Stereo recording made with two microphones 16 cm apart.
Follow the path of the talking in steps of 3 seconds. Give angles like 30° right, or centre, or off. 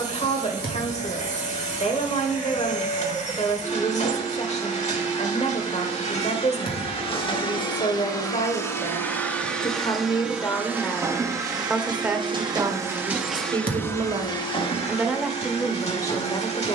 40° left, 40° left, 40° left, 20° left, 20° right, 20° left.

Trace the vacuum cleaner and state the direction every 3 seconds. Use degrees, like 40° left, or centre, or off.
50° left, 50° left, 30° left, 10° right, centre, 40° left.